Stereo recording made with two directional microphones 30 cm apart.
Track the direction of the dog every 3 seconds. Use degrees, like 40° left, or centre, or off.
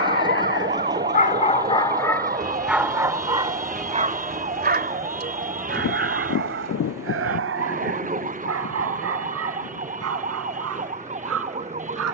20° left, 30° right, 50° right, 60° right.